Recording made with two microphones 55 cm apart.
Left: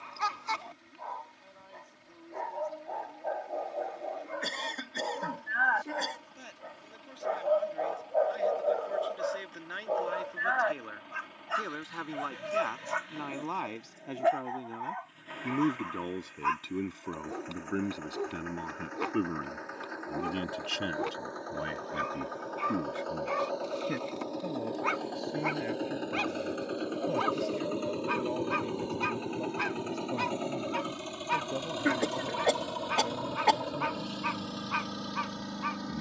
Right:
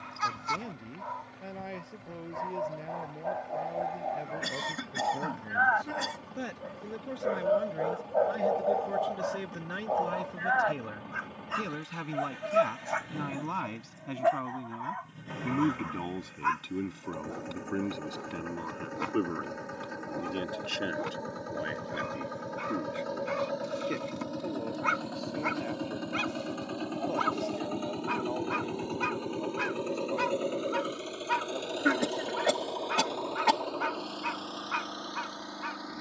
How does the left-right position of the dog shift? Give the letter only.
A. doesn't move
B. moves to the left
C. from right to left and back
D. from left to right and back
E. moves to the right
C.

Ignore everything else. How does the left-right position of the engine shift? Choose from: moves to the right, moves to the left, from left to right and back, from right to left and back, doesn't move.
moves to the left.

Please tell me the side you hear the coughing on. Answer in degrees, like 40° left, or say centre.
30° right.